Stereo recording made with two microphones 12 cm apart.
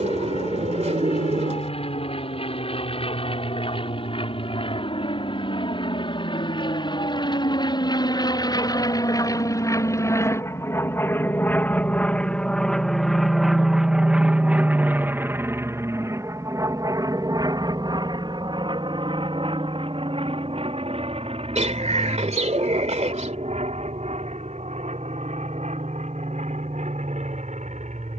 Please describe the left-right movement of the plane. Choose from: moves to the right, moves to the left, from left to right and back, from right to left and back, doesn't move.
moves to the right.